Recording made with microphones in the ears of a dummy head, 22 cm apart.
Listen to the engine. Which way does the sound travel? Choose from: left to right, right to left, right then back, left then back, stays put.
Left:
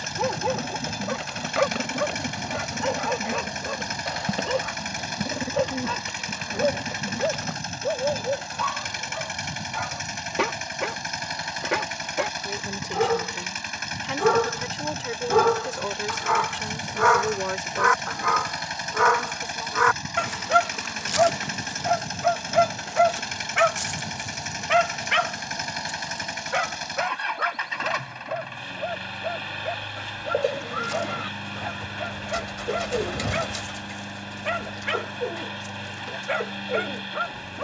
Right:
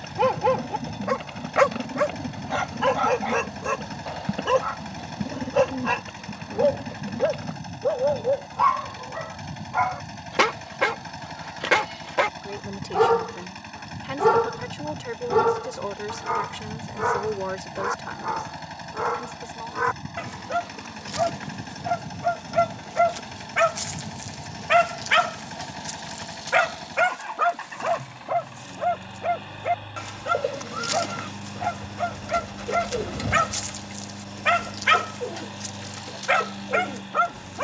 stays put.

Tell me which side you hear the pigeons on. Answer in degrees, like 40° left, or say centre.
20° left.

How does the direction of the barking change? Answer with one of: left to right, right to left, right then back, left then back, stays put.
left then back.